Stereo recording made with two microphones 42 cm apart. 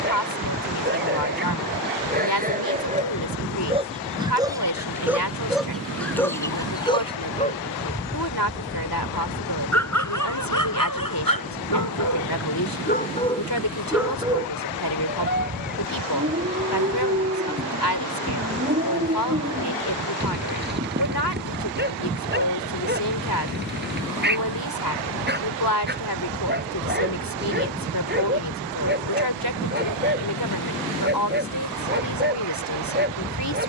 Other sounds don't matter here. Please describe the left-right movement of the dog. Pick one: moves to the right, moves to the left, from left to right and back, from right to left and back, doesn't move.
from right to left and back.